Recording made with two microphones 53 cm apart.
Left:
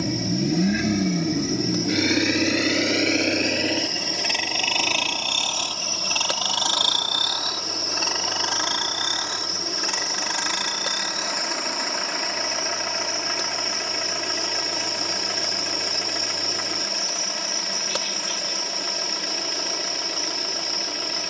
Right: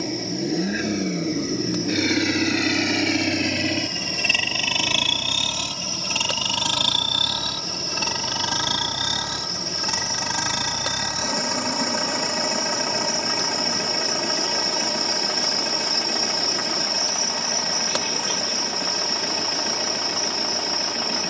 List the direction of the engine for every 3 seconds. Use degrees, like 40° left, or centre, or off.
10° left, 30° right, 50° right, 60° right, 70° right, 70° right, 70° right.